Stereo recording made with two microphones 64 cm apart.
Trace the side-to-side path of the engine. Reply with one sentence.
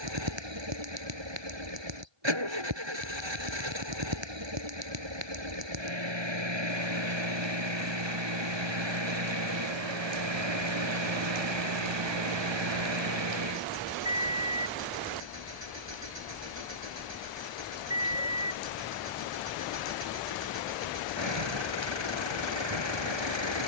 In this clip you hear the engine stay in one place.